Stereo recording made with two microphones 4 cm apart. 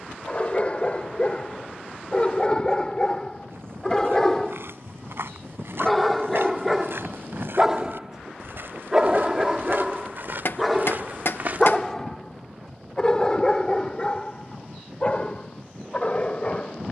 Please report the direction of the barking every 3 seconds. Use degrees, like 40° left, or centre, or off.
30° left, 10° left, 10° right, centre, 20° left, 30° left.